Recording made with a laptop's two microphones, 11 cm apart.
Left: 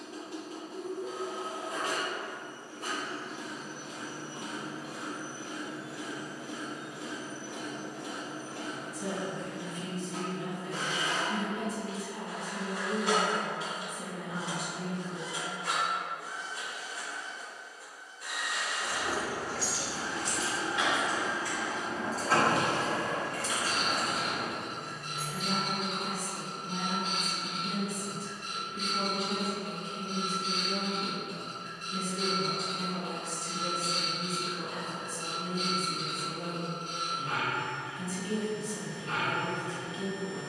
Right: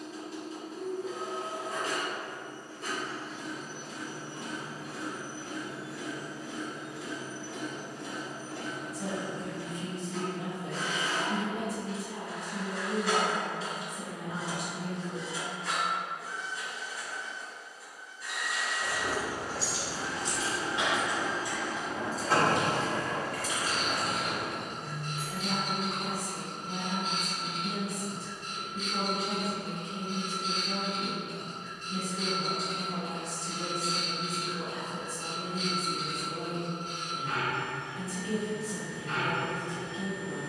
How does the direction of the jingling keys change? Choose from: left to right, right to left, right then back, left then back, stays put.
right to left.